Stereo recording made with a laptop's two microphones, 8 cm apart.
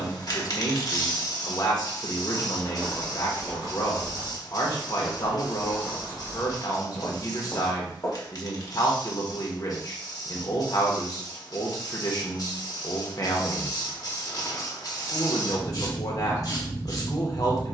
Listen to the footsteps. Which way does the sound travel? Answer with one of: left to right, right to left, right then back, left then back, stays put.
right then back.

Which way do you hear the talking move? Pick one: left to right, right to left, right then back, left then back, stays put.
stays put.